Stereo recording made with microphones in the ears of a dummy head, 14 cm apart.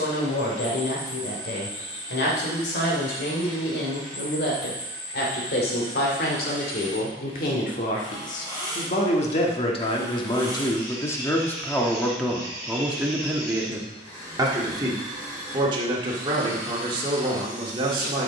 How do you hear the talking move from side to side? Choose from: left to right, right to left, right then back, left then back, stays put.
left to right.